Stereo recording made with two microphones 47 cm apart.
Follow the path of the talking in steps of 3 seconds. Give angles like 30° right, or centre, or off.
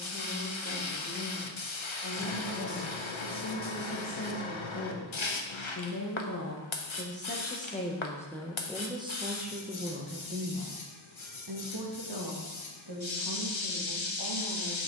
60° left, 50° left, 20° left, 30° right, 60° right.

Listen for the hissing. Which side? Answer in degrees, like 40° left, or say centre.
70° left.